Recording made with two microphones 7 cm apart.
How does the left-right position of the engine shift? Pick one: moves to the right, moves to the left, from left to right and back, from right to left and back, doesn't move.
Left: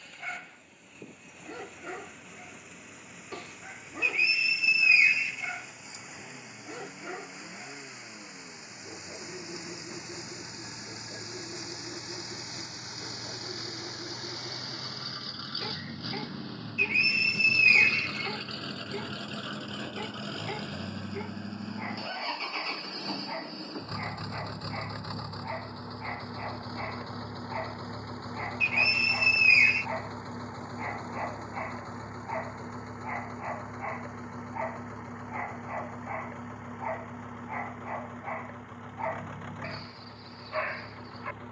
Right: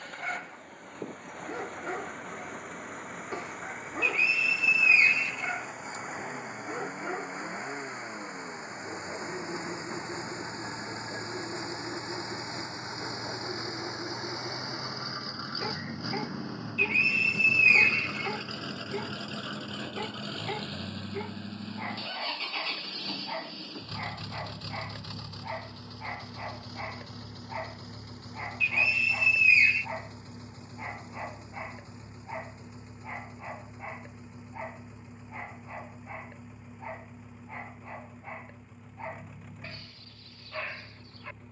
moves to the left.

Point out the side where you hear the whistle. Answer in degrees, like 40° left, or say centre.
10° left.